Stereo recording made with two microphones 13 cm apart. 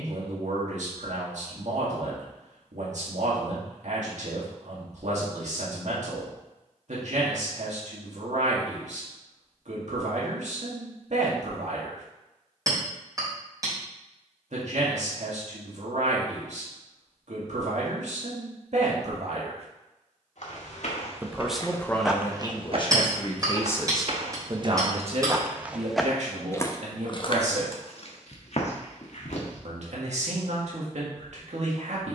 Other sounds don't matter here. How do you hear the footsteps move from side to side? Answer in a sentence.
You can hear the footsteps go right and come back.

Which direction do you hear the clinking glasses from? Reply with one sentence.
You can hear the clinking glasses on the right.